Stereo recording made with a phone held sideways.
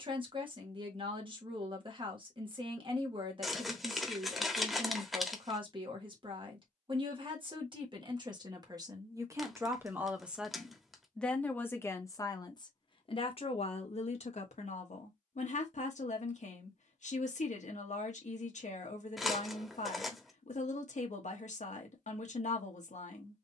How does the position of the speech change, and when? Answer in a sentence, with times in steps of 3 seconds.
In this clip you hear the speech on the right from 0 s, in the centre from 9 s and on the left from 12 s.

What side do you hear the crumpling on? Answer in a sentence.
In this clip you hear the crumpling in the centre.